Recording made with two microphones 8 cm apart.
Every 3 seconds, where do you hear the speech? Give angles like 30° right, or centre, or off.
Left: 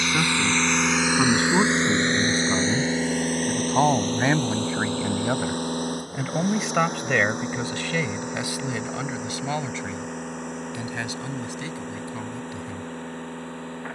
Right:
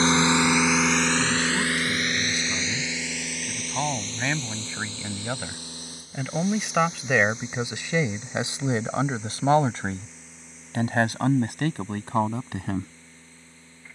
40° left, 30° left, 10° right, 50° right, 60° right.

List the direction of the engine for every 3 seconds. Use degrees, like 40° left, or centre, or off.
10° left, 50° left, 60° left, 60° left, 60° left.